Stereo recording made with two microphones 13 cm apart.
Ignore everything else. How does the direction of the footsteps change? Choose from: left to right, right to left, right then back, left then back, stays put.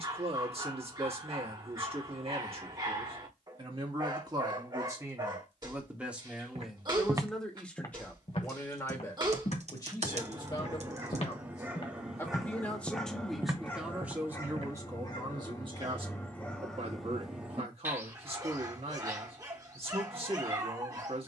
left then back.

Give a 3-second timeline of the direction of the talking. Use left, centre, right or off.
right, right, centre, left, centre, right, right.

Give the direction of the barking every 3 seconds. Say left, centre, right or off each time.
right, right, right, right, centre, centre, right.